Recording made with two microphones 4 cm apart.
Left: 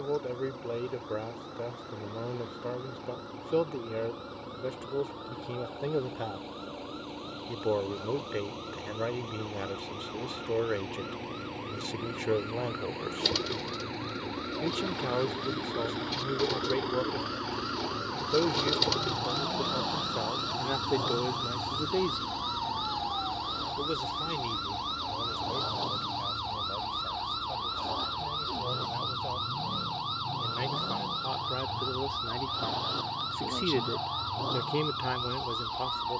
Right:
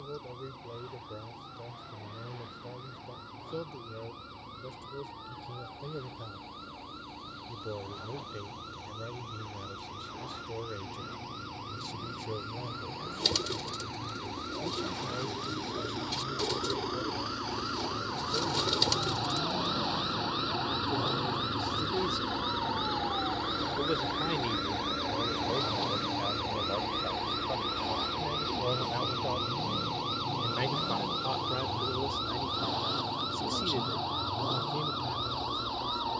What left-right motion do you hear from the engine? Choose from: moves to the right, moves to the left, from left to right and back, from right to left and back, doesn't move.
moves to the right.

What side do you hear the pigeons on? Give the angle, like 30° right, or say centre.
10° left.